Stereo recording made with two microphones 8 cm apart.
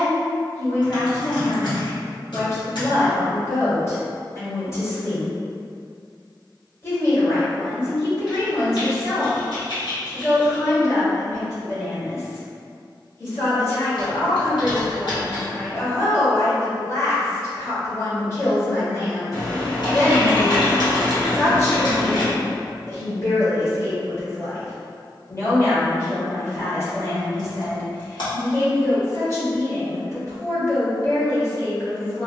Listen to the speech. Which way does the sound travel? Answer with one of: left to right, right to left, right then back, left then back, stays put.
stays put.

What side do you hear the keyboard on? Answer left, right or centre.
left.